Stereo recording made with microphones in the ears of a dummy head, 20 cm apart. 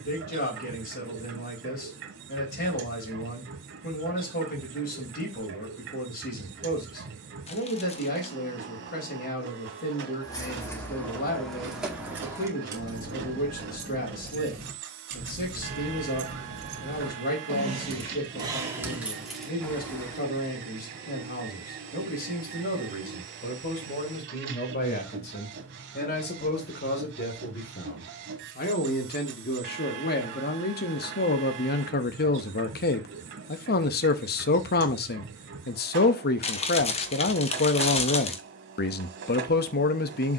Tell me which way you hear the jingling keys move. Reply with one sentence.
You can hear the jingling keys go right and come back.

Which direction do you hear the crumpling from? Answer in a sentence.
You can hear the crumpling on the left.